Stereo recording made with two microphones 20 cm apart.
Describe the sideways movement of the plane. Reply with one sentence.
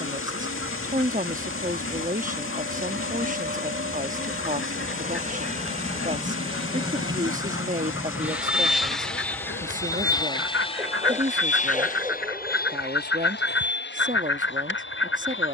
In this clip you hear the plane go from the right side to the left.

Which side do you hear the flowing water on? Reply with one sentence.
In this clip you hear the flowing water on the left.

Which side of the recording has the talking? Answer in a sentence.
You can hear the talking on the right.